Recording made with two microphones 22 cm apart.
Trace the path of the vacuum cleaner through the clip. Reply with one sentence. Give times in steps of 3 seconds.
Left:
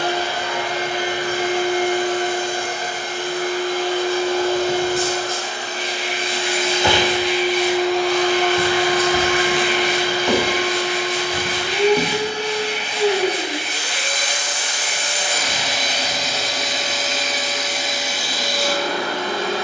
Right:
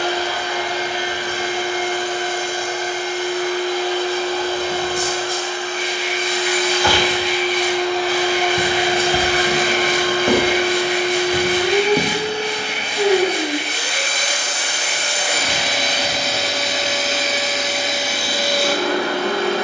You can hear the vacuum cleaner on the left from 0 s, in the centre from 6 s and on the right from 9 s.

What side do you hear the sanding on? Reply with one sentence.
You can hear the sanding in the centre.